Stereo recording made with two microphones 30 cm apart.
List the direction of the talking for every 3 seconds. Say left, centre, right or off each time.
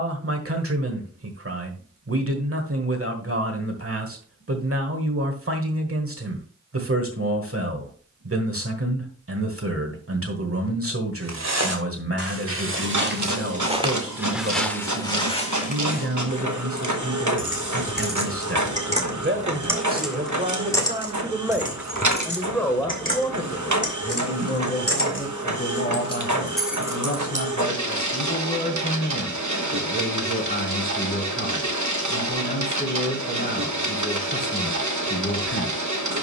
right, right, right, right, right, right, right, centre, left, left, left, left.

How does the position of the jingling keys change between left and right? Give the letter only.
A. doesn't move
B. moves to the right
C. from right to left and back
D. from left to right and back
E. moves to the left
C.